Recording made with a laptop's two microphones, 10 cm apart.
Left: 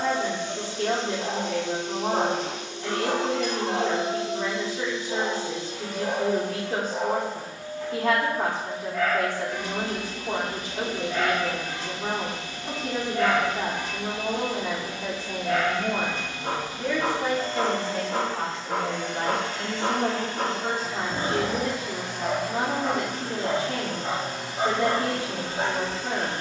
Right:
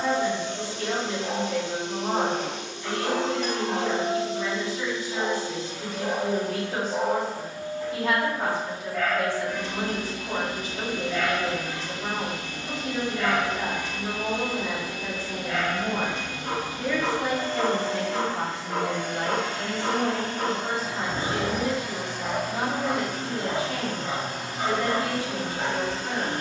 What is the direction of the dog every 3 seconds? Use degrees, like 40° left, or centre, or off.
40° left, 40° left, 10° right, 20° left, 40° left, 40° left, 40° left, 40° left, 40° left.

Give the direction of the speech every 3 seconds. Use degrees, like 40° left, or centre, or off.
50° left, 50° left, 50° left, 50° left, 50° left, 10° left, 20° left, 50° left, 50° left.